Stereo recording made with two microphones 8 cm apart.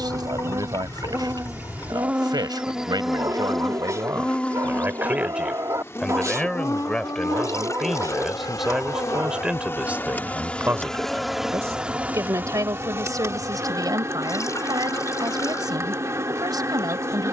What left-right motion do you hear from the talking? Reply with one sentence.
You can hear the talking go left and come back.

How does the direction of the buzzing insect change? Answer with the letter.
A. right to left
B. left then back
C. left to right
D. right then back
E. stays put
B.